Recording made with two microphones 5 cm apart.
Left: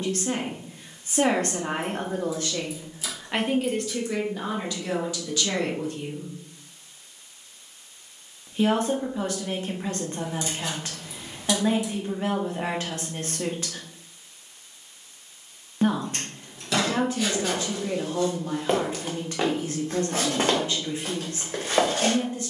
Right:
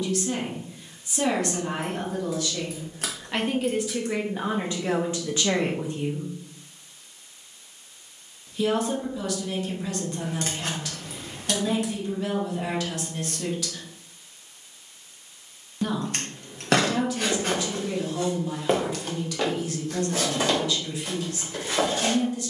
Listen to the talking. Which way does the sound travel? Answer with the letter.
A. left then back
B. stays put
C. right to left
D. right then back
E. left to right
D.